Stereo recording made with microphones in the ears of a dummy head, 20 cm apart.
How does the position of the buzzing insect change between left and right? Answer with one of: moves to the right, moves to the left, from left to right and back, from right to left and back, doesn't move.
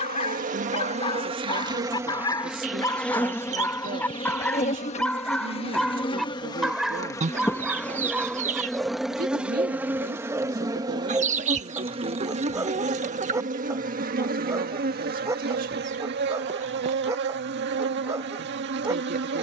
from right to left and back.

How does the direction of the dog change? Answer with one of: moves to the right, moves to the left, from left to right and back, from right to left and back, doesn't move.
moves to the right.